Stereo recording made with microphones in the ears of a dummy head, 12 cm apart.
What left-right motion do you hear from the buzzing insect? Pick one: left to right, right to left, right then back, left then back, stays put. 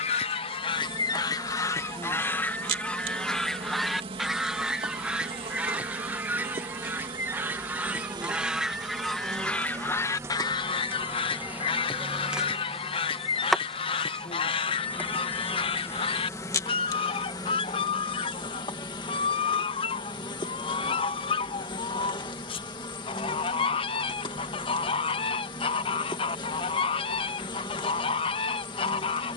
right to left.